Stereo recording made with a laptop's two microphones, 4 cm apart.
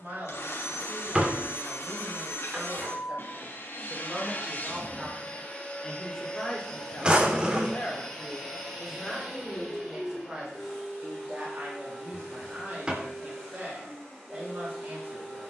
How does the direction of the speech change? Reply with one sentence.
In this clip you hear the speech go left and come back.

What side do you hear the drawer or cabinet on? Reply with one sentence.
You can hear the drawer or cabinet on the right.